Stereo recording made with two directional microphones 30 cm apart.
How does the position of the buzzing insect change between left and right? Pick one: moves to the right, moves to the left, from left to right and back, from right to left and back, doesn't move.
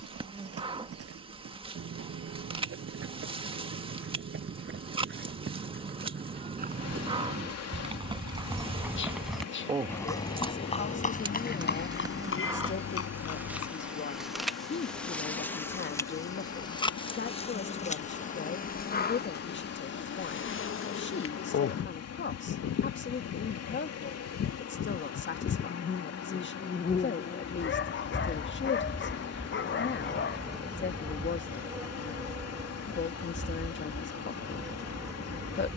from right to left and back.